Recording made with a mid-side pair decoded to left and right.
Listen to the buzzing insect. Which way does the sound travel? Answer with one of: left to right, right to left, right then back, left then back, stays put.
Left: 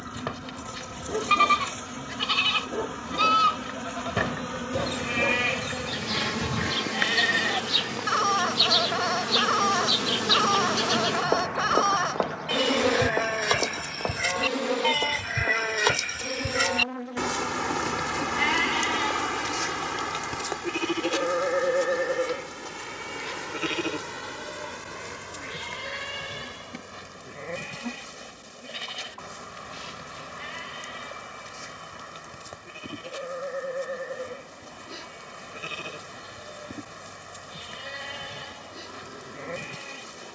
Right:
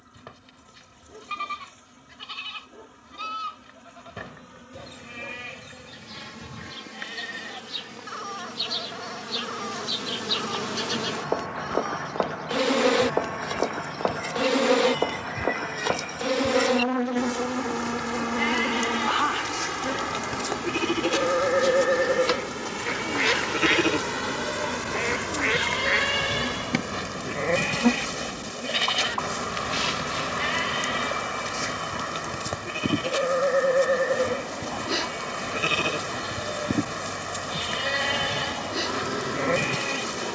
left to right.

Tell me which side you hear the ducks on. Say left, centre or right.
right.